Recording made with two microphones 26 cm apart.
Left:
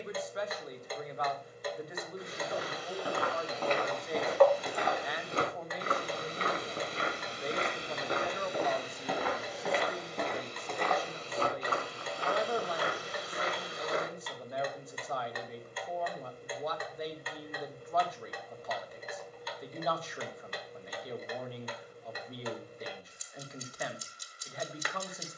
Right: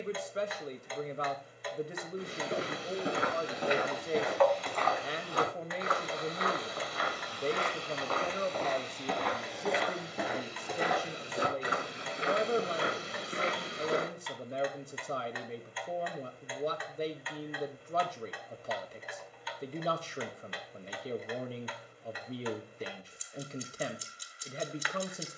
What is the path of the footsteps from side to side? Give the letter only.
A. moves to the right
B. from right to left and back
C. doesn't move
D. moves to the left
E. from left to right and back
B.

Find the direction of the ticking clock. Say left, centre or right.
left.